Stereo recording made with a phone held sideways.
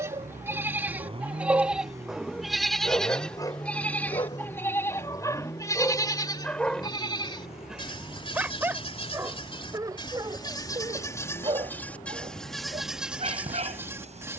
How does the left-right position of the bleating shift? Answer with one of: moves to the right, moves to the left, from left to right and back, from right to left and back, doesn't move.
from right to left and back.